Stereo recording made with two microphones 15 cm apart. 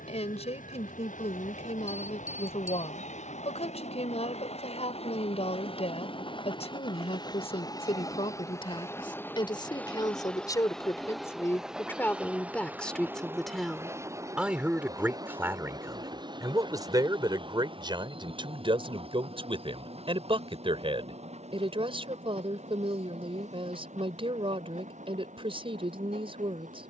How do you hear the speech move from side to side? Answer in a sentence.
In this clip you hear the speech travel towards the right.